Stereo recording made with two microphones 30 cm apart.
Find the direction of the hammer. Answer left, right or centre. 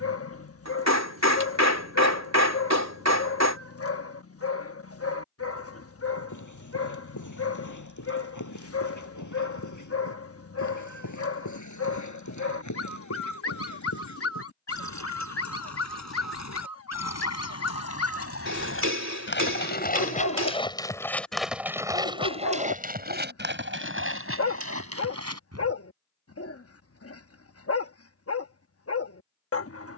right.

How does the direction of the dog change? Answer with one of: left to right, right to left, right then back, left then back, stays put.
stays put.